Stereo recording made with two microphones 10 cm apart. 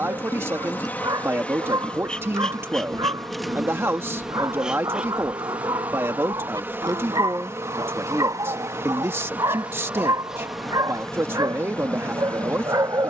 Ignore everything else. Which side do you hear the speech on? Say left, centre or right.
right.